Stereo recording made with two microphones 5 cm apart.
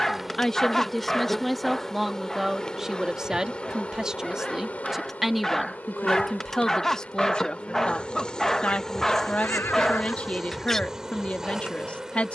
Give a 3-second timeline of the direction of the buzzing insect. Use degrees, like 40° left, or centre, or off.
10° left, 30° left, 30° left, centre.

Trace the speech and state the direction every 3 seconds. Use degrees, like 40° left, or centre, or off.
centre, 10° right, 20° left, 30° left.